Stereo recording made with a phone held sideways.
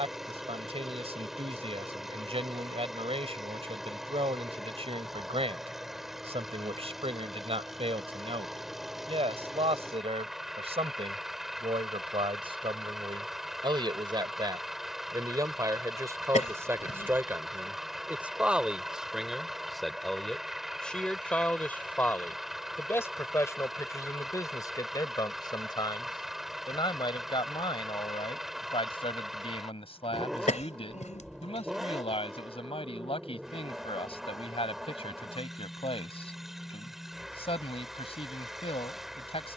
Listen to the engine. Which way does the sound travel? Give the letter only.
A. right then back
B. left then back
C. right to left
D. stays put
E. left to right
D.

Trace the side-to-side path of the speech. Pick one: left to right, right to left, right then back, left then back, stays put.
right to left.